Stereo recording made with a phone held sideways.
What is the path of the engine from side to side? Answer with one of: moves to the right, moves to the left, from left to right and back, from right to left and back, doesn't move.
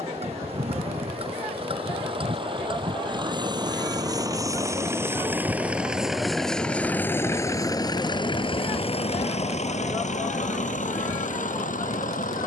moves to the left.